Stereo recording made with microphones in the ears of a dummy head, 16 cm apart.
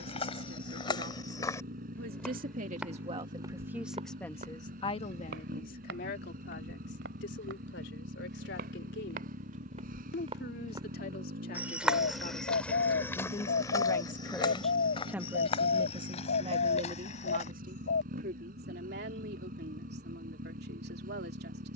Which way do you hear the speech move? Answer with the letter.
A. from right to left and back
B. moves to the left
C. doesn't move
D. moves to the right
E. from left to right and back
A.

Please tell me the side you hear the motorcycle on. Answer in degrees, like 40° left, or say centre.
50° right.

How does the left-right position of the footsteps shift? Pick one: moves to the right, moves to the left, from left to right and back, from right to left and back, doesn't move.
from left to right and back.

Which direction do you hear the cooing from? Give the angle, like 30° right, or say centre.
60° left.